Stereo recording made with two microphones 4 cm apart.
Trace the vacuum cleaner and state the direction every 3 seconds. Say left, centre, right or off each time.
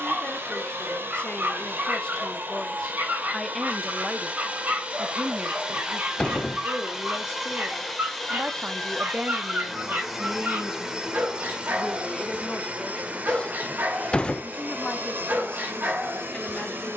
right, right, centre, centre, right, right.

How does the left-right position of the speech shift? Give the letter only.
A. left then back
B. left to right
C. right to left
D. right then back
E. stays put
D.